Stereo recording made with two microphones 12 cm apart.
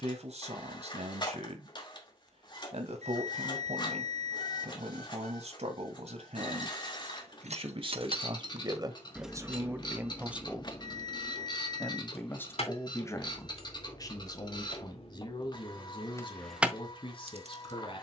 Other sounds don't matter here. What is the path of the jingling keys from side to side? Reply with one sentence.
In this clip you hear the jingling keys go left and come back.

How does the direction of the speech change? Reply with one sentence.
In this clip you hear the speech move to the left.